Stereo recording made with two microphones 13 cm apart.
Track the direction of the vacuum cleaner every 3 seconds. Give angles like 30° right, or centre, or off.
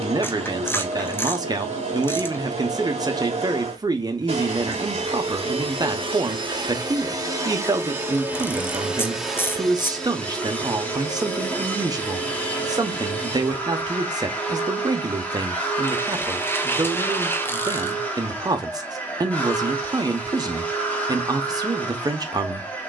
50° right, 50° right, 20° right, 10° left, 10° left, 10° left, 10° left, 10° left.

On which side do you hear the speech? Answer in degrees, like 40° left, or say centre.
30° right.